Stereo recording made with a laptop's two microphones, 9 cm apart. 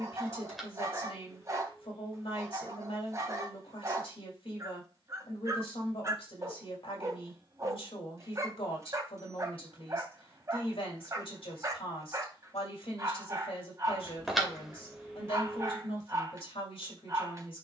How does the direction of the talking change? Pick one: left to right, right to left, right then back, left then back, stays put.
stays put.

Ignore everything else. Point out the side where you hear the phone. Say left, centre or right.
centre.